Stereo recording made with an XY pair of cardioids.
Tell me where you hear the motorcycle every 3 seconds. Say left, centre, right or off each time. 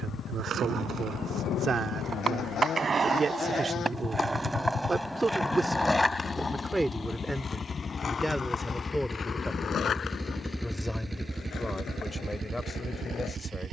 left, left, left, centre, right.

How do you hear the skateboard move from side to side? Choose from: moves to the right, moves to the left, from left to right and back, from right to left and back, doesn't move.
moves to the left.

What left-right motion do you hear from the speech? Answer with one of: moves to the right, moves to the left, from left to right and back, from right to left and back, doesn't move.
moves to the left.